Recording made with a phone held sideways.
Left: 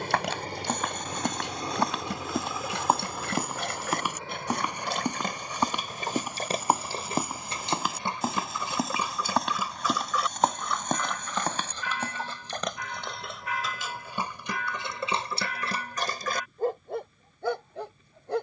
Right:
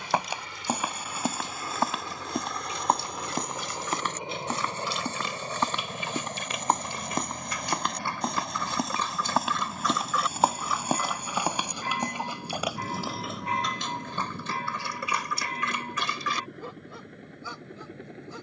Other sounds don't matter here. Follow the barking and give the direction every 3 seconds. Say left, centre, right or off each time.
left, left, left, centre, centre, left.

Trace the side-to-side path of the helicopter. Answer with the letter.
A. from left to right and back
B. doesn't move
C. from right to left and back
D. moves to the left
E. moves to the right
E.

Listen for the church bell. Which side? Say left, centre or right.
right.